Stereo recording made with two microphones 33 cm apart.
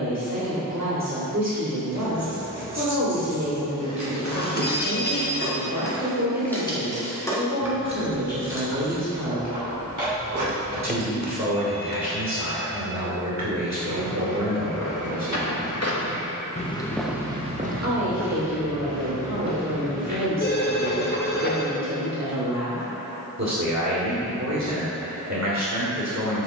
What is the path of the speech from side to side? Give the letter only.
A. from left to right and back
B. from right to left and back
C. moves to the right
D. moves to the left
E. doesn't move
E.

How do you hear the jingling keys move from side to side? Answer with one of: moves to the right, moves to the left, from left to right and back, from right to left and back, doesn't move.
from right to left and back.